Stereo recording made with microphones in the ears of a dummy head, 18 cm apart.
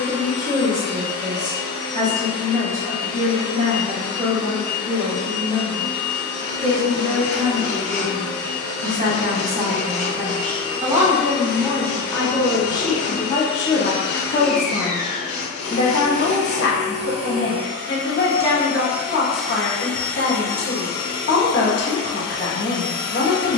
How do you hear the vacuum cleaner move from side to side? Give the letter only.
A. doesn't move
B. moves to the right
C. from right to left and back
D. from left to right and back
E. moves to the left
D.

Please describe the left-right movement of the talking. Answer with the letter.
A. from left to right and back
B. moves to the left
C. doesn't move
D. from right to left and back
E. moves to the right
B.